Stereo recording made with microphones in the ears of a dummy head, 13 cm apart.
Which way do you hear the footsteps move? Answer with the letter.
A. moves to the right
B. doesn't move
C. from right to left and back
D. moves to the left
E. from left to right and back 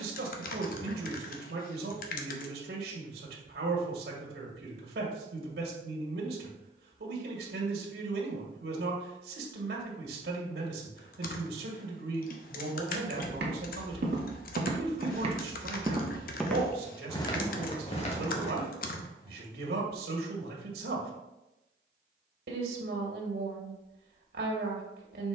D.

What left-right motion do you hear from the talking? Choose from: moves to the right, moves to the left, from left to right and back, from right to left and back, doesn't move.
doesn't move.